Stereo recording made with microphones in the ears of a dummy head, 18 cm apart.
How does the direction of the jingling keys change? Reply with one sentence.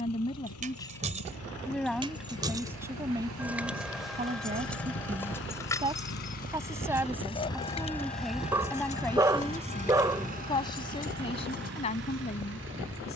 You can hear the jingling keys move to the left.